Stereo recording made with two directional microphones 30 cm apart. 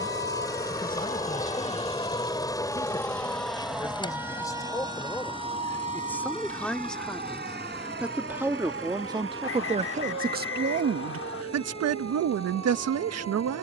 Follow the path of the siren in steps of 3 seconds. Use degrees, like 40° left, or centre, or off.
20° left, 10° right, 30° right, 50° right, 50° right.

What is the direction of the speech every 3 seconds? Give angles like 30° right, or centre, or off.
20° left, 10° left, centre, 30° right, 60° right.